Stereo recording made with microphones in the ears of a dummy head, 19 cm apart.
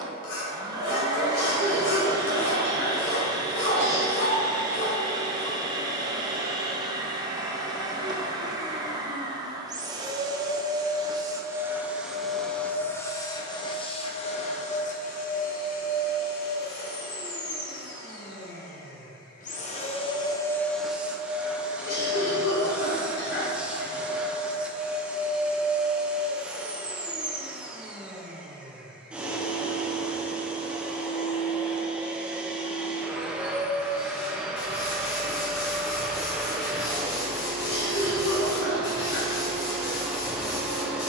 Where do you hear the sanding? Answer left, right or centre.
left.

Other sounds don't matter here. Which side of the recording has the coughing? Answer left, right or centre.
left.